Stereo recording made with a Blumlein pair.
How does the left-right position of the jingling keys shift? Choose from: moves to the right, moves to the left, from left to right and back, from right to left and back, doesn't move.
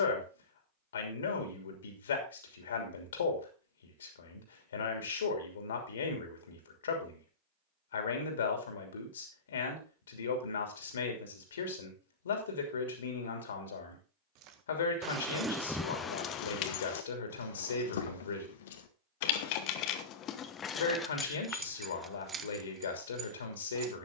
from right to left and back.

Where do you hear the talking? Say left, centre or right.
left.